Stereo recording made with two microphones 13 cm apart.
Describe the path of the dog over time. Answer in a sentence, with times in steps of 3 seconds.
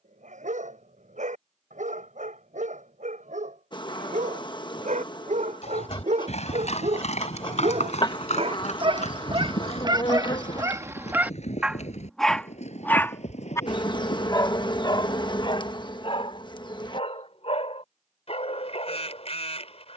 In this clip you hear the dog on the right from 0 s and on the left from 12 s.